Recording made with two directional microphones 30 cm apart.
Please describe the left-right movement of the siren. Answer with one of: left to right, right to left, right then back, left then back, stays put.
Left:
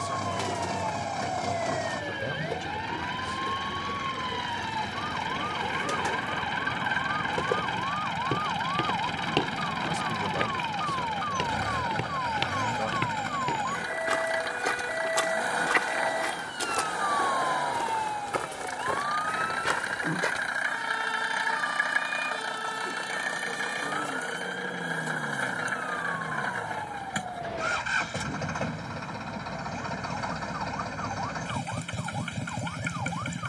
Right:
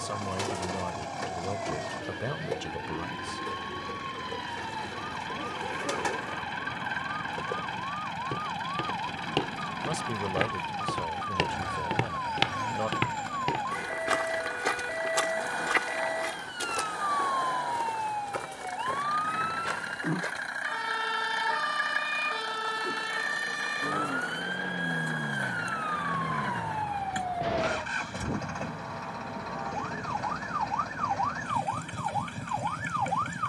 left to right.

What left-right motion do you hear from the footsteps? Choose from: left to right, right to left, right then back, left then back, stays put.
right then back.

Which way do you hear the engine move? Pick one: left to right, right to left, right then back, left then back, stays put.
stays put.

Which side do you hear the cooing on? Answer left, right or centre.
centre.